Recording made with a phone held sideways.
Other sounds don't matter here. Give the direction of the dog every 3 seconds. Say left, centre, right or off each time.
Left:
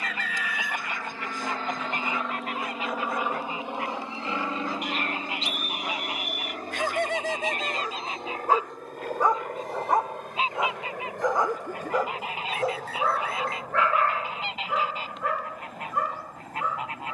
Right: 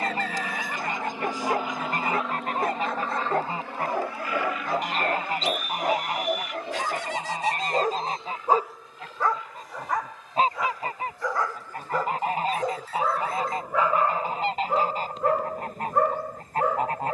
right, right, right, left, centre, right.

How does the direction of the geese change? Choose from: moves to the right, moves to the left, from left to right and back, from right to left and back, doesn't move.
doesn't move.